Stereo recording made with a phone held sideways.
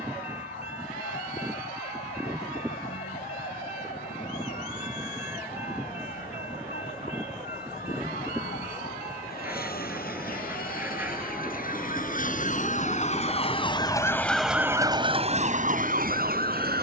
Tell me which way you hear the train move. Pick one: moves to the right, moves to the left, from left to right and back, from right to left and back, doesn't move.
doesn't move.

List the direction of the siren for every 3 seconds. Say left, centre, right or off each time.
left, left, left, left, left, right.